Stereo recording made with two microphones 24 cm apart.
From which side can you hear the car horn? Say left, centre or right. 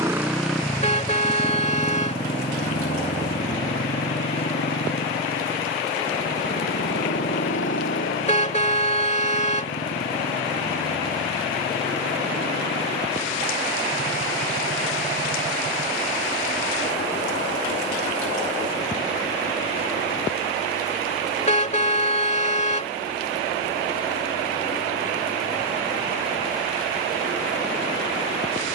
left.